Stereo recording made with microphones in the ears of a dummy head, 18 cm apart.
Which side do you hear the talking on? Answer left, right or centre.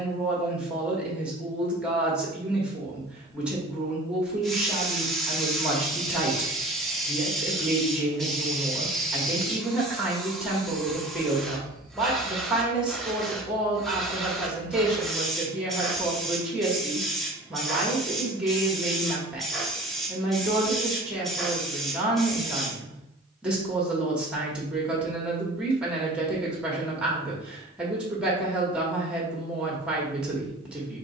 centre.